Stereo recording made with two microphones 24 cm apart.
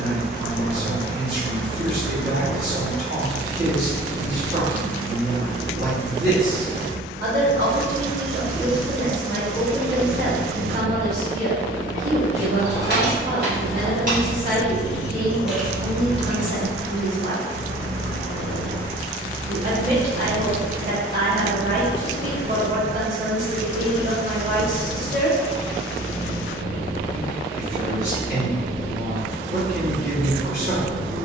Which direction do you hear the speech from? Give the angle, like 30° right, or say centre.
50° right.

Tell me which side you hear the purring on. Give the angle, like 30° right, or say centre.
70° right.